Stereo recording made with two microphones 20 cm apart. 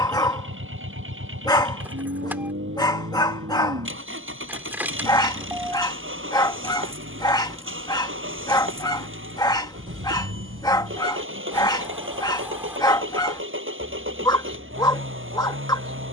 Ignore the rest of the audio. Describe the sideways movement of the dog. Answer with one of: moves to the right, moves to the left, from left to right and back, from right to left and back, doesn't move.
doesn't move.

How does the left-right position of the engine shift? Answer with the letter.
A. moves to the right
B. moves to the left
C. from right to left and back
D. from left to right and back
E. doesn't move
E.